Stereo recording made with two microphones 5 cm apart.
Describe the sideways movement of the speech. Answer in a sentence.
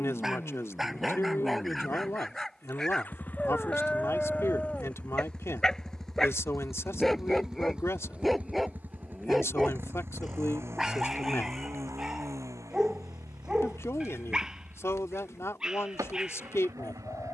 You can hear the speech stay put.